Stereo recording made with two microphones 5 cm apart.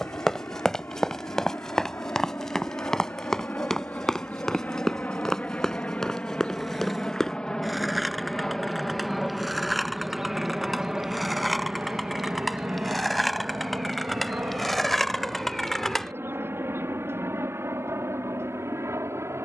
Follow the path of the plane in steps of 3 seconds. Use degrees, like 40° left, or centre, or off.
50° left, 30° left, 10° left, 10° right, 30° right, 50° right, 60° right.